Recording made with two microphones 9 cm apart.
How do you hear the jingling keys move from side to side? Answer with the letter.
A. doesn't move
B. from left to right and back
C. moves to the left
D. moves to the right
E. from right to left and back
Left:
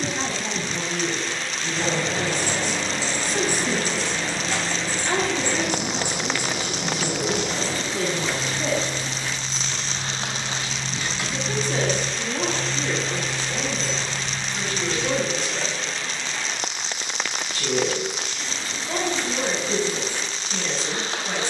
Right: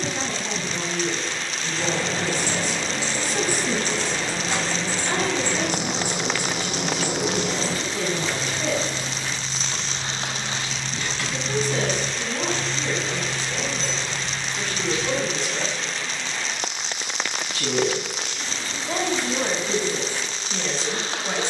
B.